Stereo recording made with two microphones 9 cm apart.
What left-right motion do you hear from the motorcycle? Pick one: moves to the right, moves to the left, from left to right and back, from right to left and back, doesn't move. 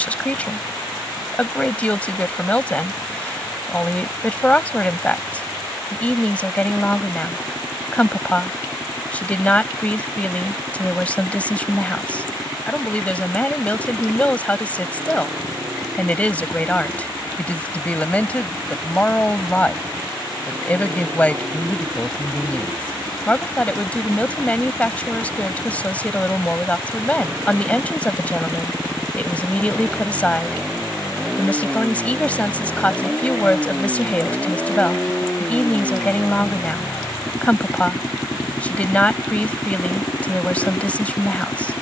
moves to the left.